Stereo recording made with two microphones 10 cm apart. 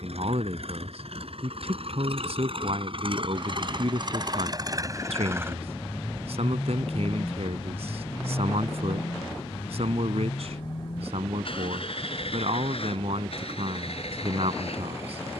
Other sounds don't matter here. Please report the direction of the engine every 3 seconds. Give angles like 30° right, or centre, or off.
60° right, 40° right, 20° left, 50° left, 60° left.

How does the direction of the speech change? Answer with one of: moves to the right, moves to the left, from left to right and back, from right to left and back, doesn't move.
doesn't move.